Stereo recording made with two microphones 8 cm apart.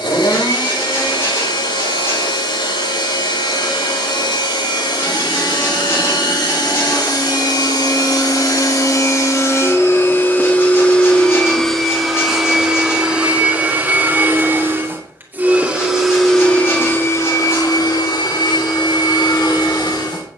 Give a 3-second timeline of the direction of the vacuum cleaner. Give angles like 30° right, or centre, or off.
80° left, 80° left, 60° left, 20° left, 20° right, 20° left, 70° left.